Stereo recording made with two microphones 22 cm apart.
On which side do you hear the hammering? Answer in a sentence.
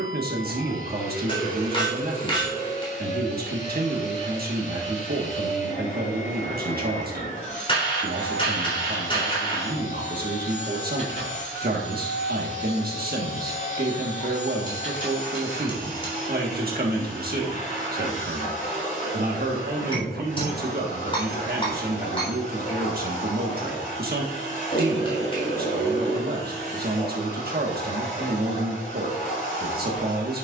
You can hear the hammering on the left.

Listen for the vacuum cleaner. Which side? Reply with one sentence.
In this clip you hear the vacuum cleaner on the left.